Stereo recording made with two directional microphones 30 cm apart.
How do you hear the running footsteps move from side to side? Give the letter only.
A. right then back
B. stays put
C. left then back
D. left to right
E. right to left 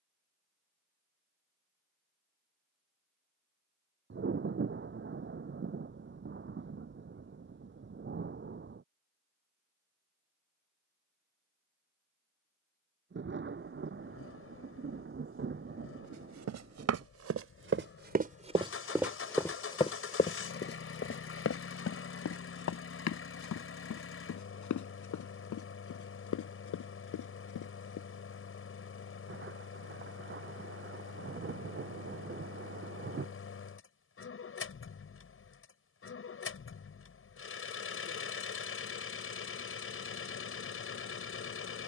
E.